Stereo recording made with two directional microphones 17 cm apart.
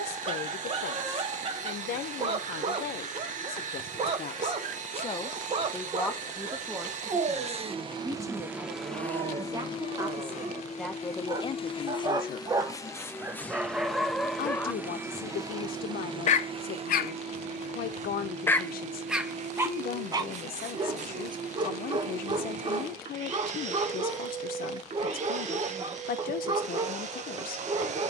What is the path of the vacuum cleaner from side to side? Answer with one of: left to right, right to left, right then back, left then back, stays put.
left then back.